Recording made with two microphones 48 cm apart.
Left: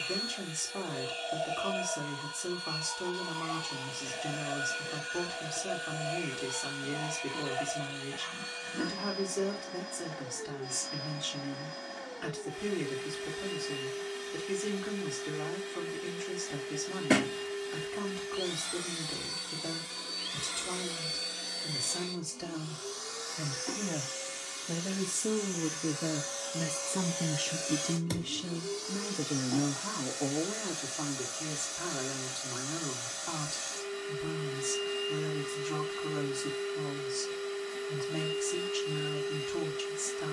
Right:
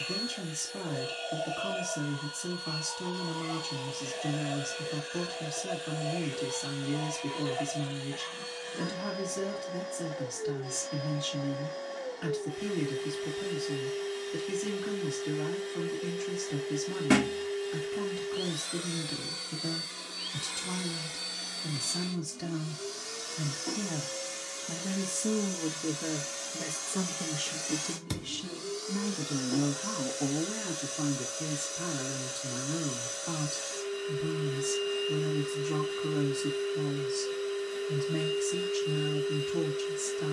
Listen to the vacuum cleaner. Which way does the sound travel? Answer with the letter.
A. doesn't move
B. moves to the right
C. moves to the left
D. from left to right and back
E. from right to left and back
D.